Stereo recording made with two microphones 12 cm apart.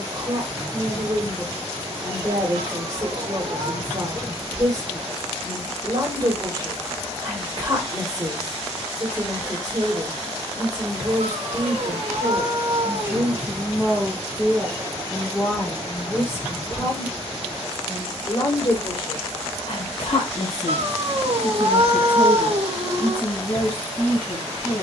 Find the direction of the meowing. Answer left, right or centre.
right.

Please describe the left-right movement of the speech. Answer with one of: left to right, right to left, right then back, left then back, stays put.
right to left.